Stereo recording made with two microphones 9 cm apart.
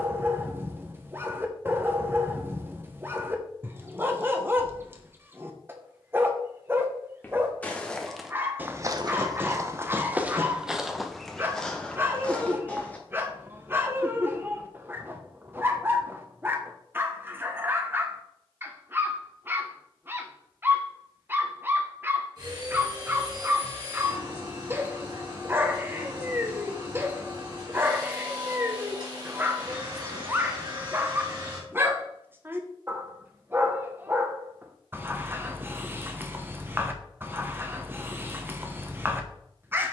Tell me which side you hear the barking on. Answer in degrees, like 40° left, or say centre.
20° right.